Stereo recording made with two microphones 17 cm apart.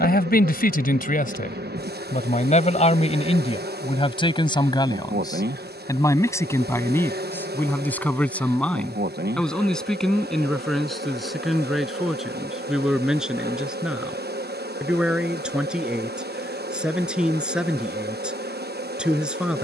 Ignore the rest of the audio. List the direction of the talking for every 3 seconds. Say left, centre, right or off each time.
left, left, centre, centre, centre, centre, centre.